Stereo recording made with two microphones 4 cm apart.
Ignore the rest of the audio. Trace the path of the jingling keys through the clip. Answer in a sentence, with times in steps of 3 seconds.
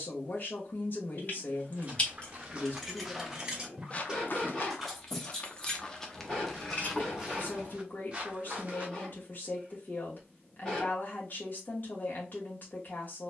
You can hear the jingling keys on the left from 0 s, in the centre from 3 s, on the left from 6 s and not at all from 9 s.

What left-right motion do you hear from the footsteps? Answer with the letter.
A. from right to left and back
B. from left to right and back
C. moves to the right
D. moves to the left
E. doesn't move
A.